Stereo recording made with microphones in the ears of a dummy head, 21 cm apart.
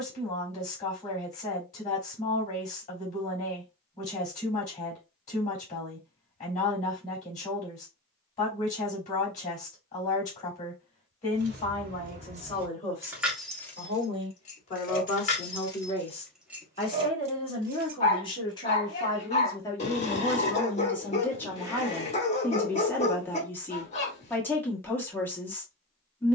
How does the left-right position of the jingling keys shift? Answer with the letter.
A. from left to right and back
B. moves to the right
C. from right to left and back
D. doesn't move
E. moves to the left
C.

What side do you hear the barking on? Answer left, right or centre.
left.